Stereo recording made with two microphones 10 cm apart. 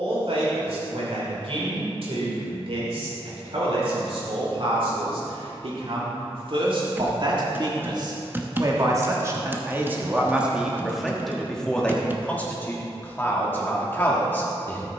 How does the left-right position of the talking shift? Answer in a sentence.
In this clip you hear the talking move to the left.